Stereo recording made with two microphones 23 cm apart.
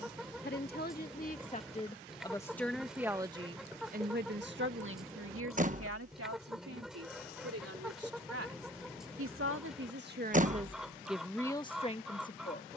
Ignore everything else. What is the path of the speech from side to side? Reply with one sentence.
You can hear the speech go right and come back.